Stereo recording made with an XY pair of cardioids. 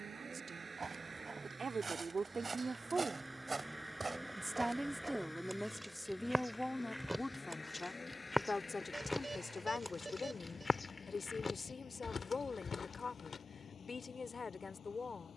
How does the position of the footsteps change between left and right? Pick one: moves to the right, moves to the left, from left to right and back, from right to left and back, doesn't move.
moves to the left.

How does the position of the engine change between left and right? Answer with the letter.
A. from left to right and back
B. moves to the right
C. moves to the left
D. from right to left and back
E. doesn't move
C.